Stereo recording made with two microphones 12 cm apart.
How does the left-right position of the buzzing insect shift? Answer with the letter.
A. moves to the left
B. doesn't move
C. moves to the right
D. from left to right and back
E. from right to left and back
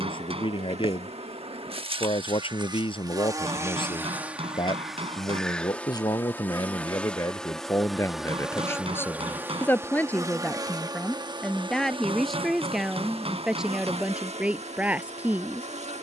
E.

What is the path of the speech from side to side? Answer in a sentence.
You can hear the speech travel towards the right.